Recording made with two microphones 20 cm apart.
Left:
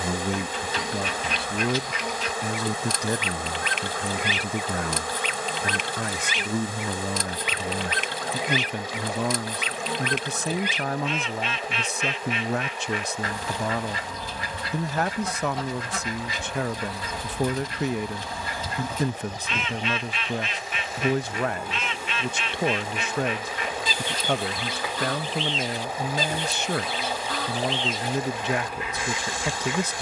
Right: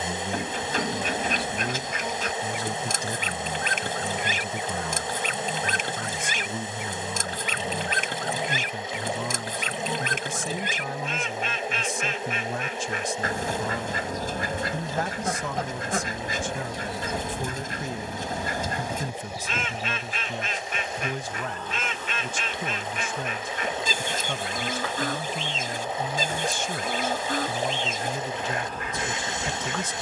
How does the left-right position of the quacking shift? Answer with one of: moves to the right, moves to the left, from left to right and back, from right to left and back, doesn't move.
doesn't move.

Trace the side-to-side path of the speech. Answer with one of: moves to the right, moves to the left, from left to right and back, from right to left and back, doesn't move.
doesn't move.